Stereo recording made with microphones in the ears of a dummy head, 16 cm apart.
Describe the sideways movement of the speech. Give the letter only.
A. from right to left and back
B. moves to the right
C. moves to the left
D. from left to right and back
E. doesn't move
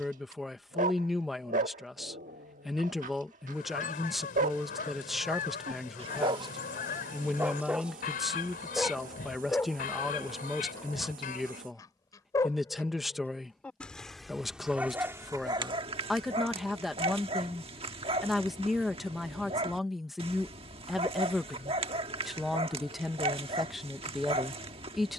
E.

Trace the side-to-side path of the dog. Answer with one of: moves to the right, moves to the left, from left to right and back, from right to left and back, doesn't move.
from right to left and back.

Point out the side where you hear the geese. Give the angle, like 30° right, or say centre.
50° left.